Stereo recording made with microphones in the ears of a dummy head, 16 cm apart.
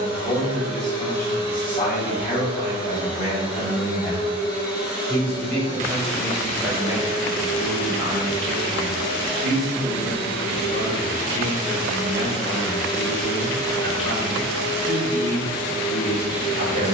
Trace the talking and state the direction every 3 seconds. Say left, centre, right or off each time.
left, left, right, right, right, right.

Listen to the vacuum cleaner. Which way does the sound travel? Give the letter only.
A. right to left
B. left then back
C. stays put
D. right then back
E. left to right
C.